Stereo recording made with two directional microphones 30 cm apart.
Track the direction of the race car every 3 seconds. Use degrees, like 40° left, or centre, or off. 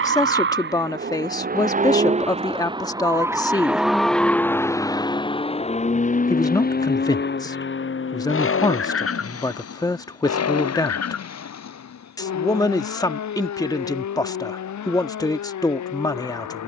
30° right, 10° left, 40° left, 50° left, 60° left, 60° left.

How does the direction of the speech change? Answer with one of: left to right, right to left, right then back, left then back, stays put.
stays put.